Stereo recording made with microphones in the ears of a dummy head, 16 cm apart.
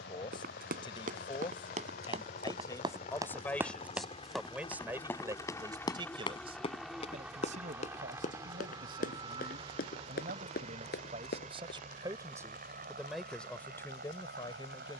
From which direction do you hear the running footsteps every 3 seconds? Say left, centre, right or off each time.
right, centre, left, left, off.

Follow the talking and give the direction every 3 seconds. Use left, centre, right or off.
left, centre, right, right, centre.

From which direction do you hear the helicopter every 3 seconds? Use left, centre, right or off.
left, left, centre, right, right.